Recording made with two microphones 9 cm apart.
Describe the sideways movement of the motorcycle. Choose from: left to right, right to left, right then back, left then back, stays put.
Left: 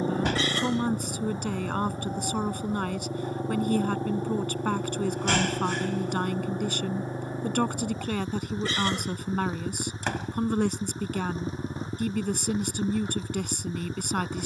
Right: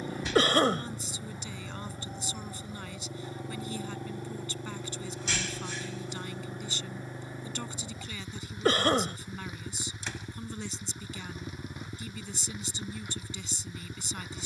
stays put.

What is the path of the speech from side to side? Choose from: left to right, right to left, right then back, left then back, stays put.
stays put.